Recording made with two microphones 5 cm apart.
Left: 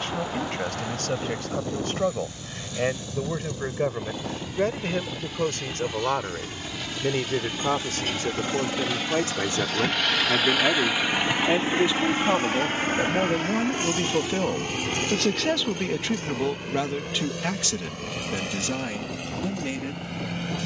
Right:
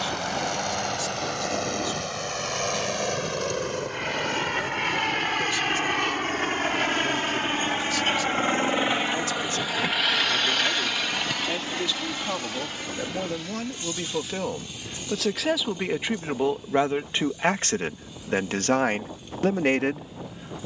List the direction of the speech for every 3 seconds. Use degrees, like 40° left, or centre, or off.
50° left, 50° left, 50° left, 40° left, 20° left, 20° right, 50° right.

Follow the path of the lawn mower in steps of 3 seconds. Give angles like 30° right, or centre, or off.
70° right, 70° right, 50° right, centre, 50° left, 70° left, 70° left.